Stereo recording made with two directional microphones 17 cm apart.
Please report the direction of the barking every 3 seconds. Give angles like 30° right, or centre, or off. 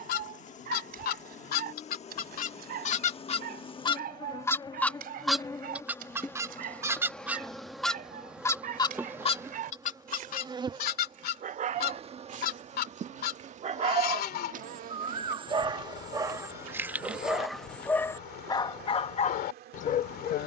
60° right, 60° right, 60° right, 50° right, 40° right, 10° right, 40° left.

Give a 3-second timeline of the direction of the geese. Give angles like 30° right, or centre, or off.
60° left, 20° left, centre, 50° left, 70° left, 70° left, 70° left.